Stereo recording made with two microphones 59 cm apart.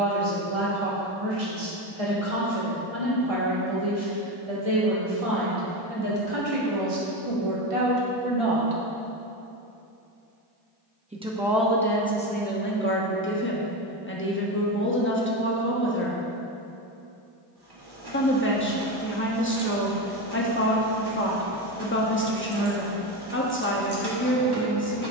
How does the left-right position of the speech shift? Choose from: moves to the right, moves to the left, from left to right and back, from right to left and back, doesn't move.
moves to the left.